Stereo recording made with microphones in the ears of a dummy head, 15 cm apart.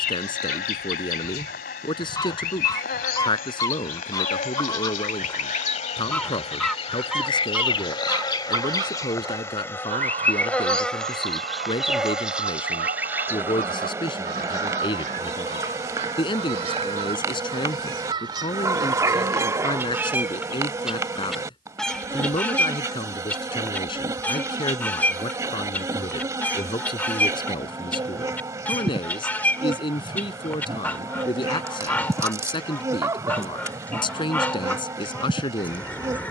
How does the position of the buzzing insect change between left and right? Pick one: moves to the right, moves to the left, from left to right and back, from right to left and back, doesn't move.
moves to the right.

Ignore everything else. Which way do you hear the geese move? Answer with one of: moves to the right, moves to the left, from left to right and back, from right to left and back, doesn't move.
from left to right and back.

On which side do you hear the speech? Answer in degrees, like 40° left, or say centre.
30° left.